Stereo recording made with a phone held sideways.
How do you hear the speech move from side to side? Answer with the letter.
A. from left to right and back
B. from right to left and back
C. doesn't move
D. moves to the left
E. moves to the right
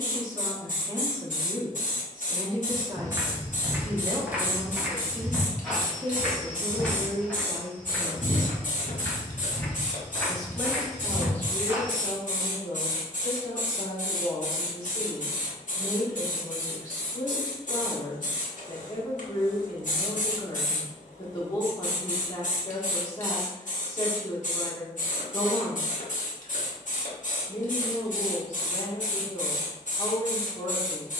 D.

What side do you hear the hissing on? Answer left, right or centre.
left.